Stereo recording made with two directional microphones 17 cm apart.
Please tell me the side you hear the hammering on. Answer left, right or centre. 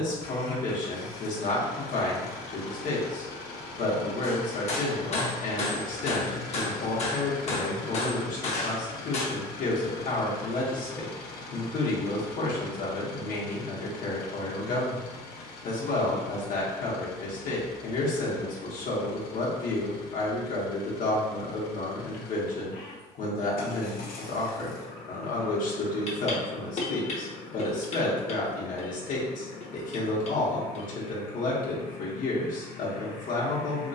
left.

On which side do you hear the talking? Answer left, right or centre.
left.